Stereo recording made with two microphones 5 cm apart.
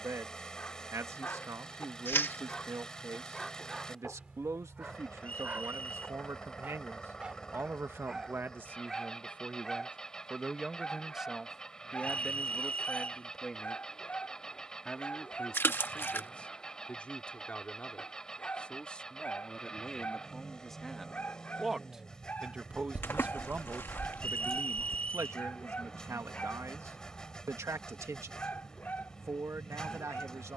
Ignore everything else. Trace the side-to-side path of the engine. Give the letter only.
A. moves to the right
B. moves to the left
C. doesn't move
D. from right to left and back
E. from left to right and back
C.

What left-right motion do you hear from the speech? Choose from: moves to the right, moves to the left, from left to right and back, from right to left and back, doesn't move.
from right to left and back.